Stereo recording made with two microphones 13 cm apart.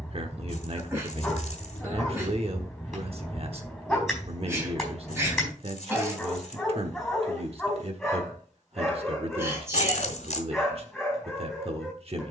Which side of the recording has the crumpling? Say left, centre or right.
left.